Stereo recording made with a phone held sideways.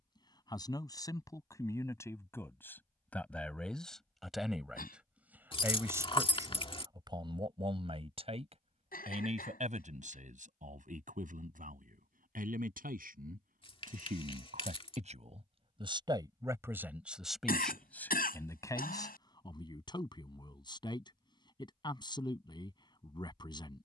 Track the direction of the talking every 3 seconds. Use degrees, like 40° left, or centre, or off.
20° left, centre, 30° right, 60° right, 70° right, 20° right, 30° left, 30° left.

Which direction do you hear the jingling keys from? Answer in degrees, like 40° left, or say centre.
40° left.